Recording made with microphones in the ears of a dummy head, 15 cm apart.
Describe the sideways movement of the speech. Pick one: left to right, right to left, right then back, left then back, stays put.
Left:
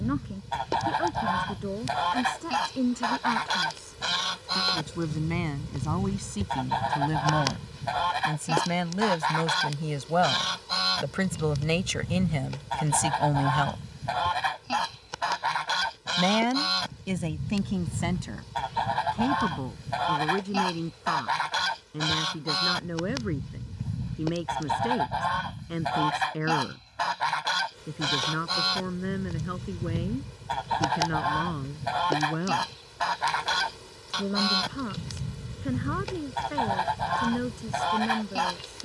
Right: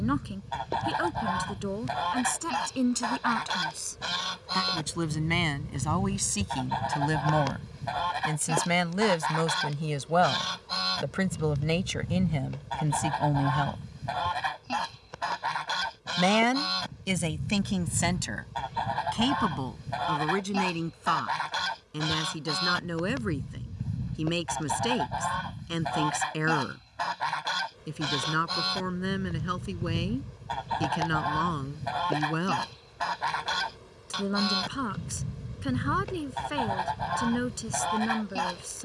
left then back.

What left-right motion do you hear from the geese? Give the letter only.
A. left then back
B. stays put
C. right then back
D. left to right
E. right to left
B.